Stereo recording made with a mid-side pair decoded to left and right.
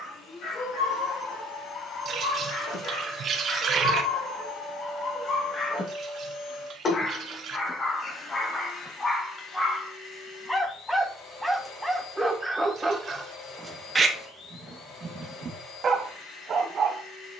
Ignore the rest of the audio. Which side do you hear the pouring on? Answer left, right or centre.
right.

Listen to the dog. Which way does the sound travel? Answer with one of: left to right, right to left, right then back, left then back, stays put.
left to right.